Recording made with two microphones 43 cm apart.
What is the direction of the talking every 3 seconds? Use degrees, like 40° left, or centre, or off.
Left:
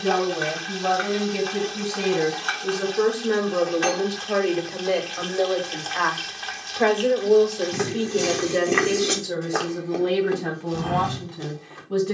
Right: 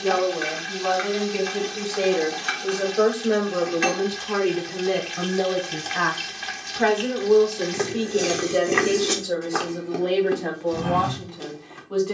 30° left, 20° right, 10° right, 30° left.